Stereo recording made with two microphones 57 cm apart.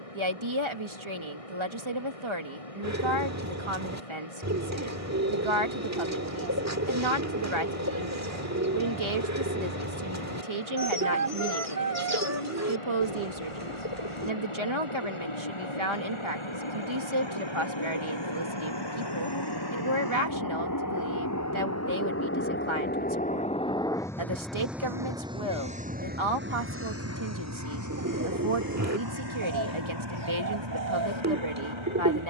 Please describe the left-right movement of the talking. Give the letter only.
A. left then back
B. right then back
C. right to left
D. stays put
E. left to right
D.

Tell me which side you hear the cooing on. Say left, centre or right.
right.